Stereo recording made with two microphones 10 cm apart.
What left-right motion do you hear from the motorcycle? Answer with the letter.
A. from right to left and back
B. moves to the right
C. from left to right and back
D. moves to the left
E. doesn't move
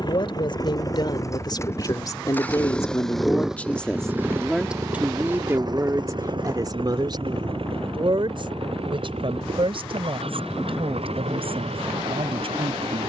B.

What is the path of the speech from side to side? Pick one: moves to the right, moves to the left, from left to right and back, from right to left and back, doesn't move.
moves to the right.